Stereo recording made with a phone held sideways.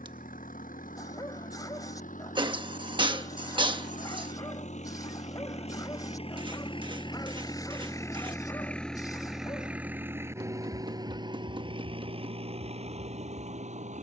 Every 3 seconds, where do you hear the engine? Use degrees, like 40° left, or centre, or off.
70° left, 50° left, 30° left, 20° right, 50° right.